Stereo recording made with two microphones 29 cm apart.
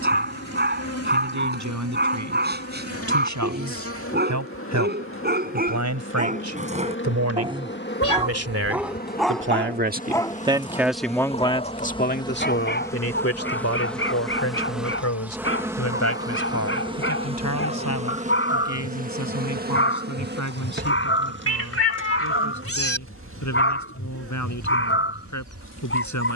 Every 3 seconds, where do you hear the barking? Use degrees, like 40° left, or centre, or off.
40° right, 30° right, 20° right, 10° left, 40° left, 50° left, 50° left, 50° left, 50° left.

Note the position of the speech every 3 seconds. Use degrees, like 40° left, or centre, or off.
80° right, 80° right, 60° right, 10° right, 50° left, 70° left, 80° left, 80° left, 80° left.